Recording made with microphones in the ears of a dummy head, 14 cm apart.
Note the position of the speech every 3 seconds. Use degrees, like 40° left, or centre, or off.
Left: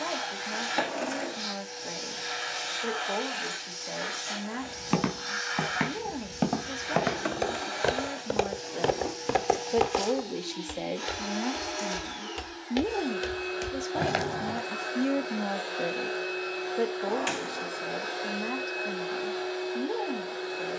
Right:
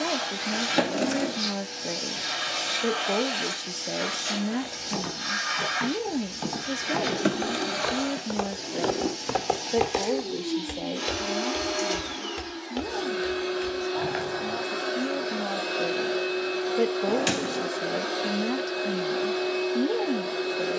40° right, 40° right, 30° right, 10° left, 30° left, 10° right, 30° right.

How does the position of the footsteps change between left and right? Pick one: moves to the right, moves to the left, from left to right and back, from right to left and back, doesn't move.
from left to right and back.